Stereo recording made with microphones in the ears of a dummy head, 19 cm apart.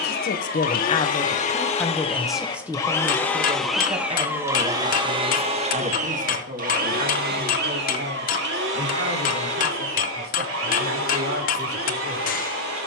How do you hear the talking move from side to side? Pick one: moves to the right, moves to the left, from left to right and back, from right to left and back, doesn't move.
moves to the right.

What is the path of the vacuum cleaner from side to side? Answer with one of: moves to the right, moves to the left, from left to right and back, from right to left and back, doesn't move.
moves to the right.